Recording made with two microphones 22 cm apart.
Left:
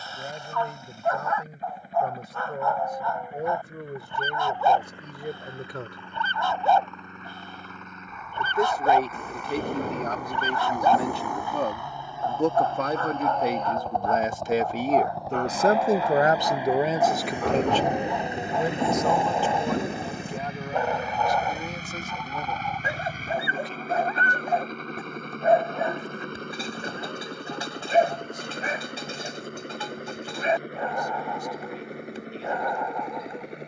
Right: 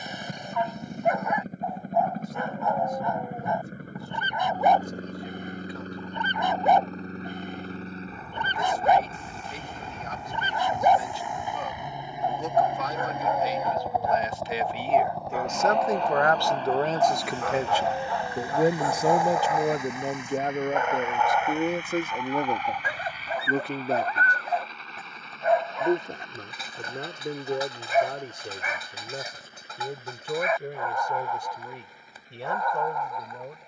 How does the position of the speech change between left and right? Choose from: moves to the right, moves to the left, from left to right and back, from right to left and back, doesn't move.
moves to the right.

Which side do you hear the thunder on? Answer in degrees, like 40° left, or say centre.
70° left.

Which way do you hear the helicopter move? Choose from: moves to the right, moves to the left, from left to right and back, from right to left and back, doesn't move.
moves to the left.